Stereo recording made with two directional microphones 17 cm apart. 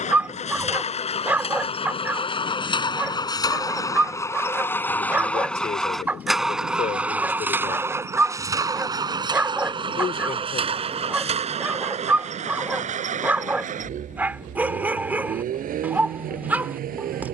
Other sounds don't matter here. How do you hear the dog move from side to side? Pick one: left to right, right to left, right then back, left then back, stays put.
stays put.